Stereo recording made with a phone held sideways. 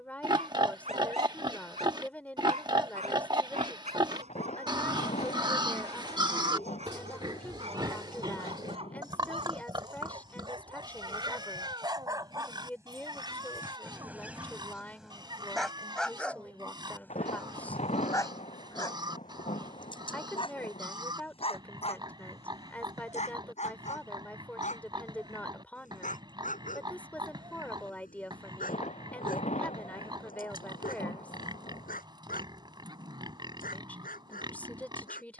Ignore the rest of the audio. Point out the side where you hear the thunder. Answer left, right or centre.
left.